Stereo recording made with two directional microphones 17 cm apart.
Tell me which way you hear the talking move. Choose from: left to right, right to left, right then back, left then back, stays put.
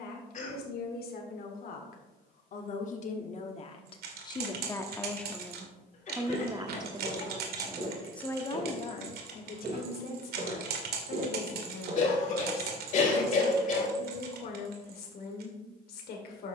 right then back.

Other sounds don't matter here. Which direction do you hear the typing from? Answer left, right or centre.
right.